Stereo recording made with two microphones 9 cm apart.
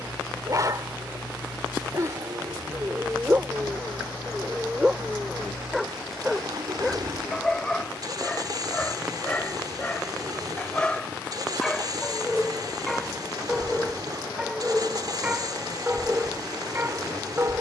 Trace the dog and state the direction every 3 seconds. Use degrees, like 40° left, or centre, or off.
40° right, 10° right, 10° left, 10° left, centre, 20° right.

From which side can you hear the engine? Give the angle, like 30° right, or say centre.
50° right.